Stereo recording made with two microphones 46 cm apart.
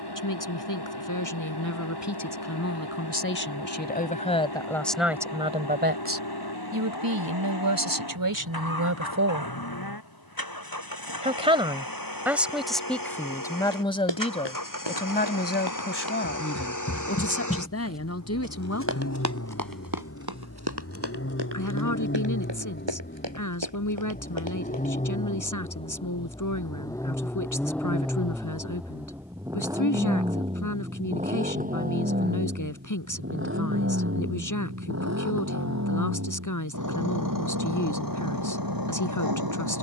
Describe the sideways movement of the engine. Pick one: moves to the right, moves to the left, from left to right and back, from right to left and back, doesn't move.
moves to the right.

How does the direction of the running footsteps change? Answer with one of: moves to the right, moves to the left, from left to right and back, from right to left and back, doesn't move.
moves to the right.